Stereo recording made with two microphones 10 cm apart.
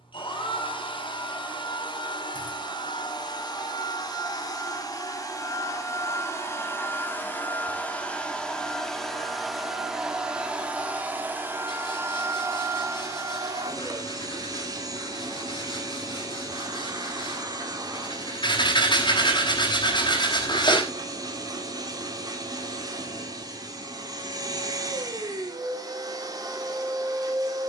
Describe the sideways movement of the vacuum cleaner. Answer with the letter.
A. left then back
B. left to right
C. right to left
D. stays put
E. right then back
B.